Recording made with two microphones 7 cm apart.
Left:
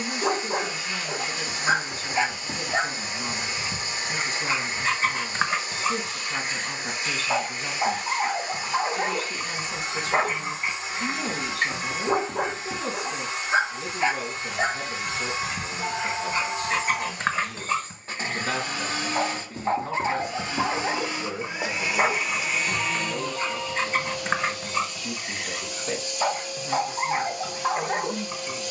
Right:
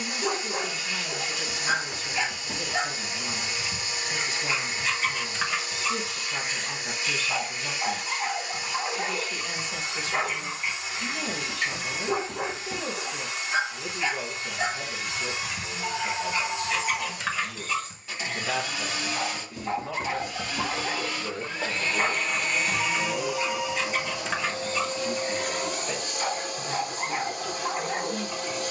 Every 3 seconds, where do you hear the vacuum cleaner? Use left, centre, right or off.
left, left, left, left, left, left, left, centre, right, right.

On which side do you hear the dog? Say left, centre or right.
left.